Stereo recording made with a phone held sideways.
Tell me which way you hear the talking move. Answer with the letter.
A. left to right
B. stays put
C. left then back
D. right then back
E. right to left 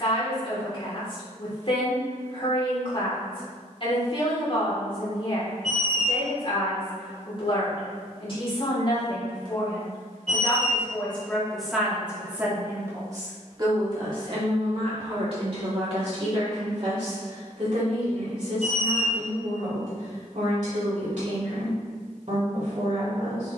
A.